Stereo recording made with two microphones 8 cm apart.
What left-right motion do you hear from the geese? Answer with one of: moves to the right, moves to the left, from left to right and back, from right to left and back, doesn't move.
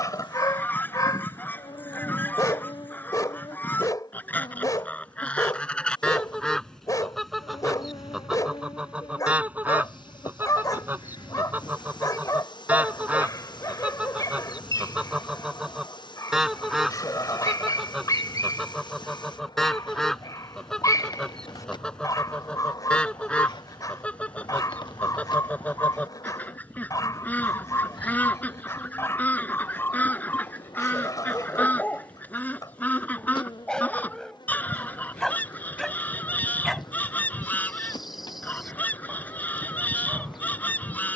from left to right and back.